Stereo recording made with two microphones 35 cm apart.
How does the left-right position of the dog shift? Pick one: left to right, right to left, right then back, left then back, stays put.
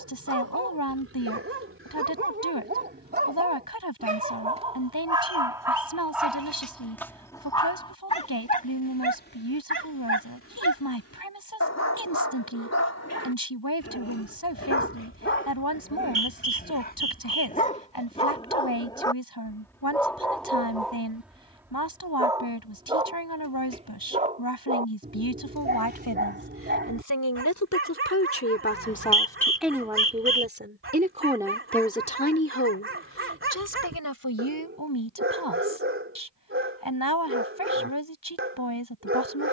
left then back.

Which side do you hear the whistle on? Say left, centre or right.
right.